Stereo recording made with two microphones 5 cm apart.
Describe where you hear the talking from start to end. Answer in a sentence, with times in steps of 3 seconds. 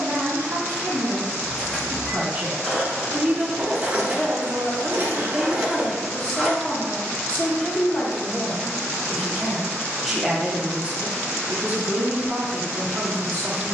In this clip you hear the talking on the right from 0 s, in the centre from 3 s, on the left from 6 s, in the centre from 9 s and on the right from 12 s.